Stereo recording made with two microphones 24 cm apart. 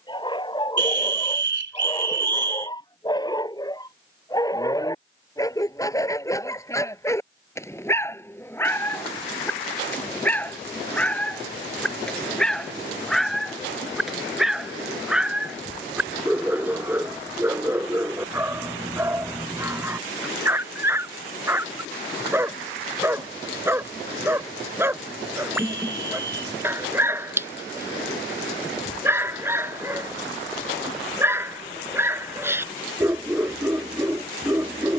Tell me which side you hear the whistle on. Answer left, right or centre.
right.